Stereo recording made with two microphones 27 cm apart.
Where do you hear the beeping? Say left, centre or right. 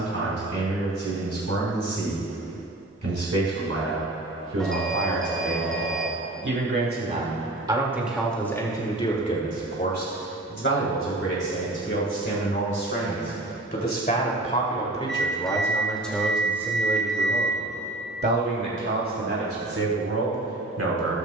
centre.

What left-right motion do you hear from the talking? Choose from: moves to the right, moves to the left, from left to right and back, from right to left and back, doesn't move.
from right to left and back.